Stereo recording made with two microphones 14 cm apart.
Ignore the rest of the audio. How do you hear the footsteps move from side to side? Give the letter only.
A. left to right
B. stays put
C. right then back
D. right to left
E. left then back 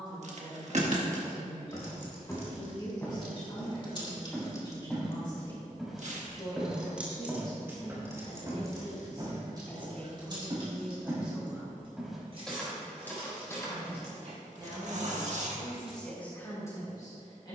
C.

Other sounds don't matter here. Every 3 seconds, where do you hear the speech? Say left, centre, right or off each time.
left, left, left, centre, right, centre.